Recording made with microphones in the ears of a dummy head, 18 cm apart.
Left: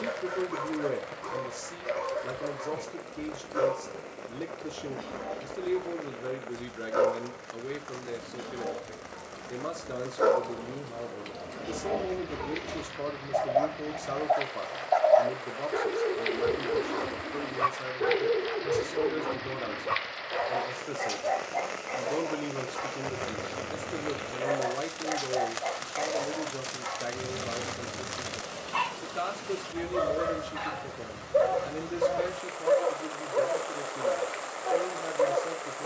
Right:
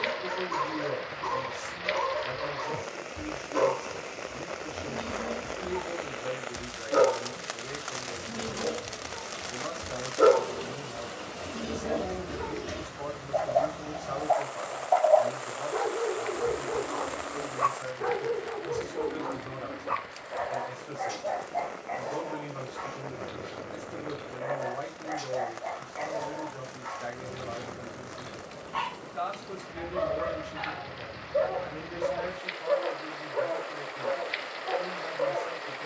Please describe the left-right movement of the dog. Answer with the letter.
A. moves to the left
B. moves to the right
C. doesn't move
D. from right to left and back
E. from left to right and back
A.